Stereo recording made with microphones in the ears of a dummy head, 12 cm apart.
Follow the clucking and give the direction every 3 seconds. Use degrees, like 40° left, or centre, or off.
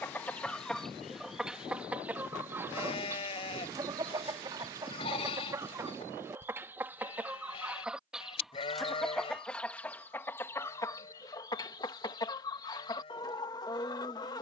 centre, 30° right, 10° right, 20° left, 30° left.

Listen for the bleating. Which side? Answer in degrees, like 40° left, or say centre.
40° left.